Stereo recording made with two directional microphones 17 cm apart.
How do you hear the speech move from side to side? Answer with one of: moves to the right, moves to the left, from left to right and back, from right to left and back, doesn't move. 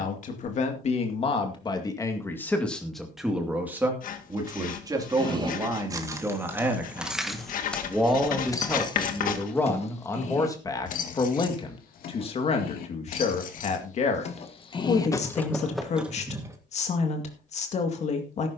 from left to right and back.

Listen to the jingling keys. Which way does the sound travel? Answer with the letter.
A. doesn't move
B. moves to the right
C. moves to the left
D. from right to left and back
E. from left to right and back
D.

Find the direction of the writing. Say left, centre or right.
left.